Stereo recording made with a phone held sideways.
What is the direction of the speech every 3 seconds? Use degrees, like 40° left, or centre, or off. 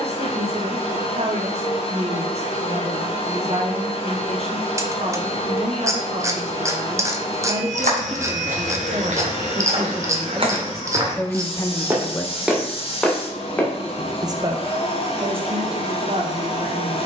50° right, 50° right, 40° right, centre, 10° right, 50° right.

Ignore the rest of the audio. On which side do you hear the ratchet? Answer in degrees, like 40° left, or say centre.
20° right.